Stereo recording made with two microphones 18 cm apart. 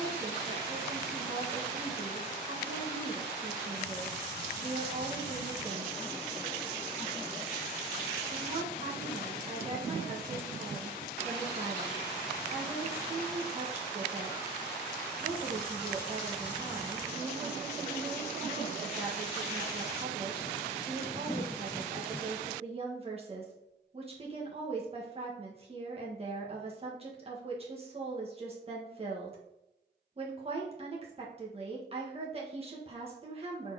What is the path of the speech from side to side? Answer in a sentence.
You can hear the speech stay put.